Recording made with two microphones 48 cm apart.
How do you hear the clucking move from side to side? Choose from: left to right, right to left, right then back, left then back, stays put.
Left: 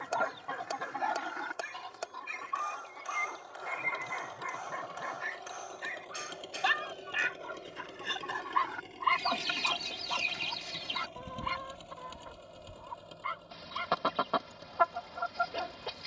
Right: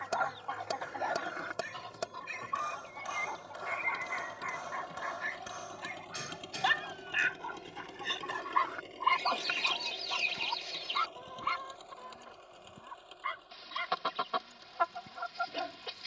right then back.